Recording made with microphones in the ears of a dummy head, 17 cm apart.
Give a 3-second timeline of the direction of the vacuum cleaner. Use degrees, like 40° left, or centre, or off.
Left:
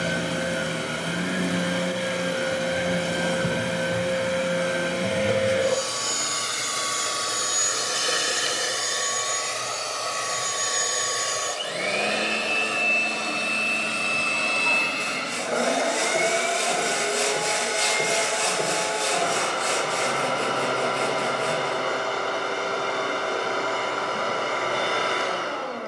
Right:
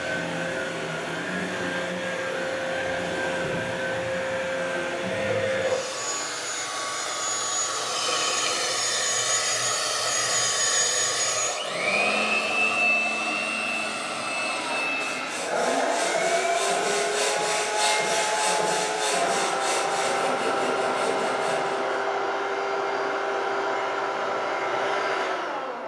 60° left, 60° left, 30° left, centre, 30° left, 50° left, 50° left, 50° left, 50° left.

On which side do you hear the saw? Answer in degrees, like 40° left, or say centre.
30° left.